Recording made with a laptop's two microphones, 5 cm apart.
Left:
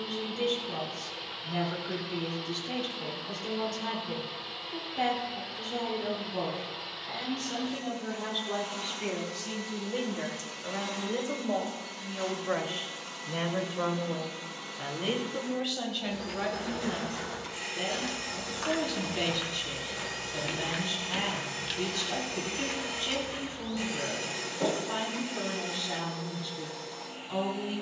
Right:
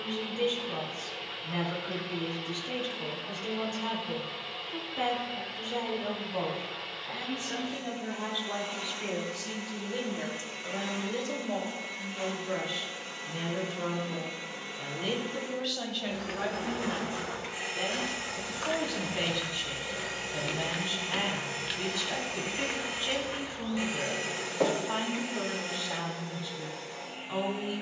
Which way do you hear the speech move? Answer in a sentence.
In this clip you hear the speech go left and come back.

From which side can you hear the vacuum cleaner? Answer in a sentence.
In this clip you hear the vacuum cleaner on the right.